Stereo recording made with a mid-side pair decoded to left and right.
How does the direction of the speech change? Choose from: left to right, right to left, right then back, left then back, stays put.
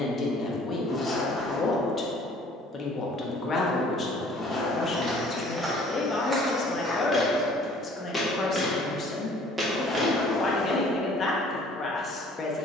stays put.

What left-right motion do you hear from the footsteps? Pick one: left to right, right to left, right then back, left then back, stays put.
left then back.